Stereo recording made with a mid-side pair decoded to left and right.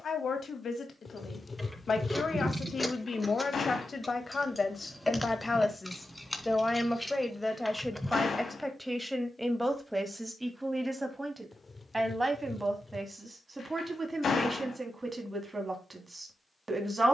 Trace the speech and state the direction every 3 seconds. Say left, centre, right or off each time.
left, left, centre, centre, right, right.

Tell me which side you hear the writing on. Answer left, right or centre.
left.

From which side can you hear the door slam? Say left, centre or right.
left.